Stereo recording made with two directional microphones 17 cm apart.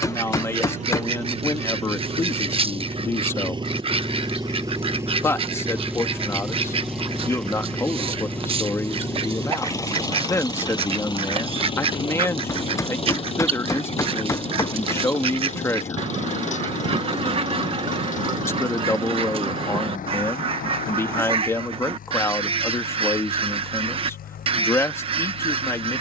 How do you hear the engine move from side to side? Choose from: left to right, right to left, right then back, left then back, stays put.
right to left.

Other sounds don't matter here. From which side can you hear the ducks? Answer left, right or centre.
right.